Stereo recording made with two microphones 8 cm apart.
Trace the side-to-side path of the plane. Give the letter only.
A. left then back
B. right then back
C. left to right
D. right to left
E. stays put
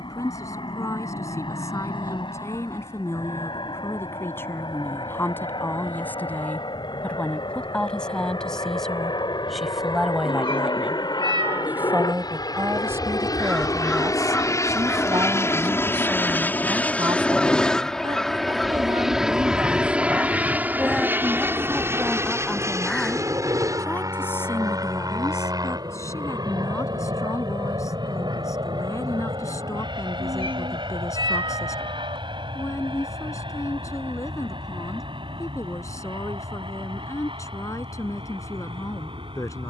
C.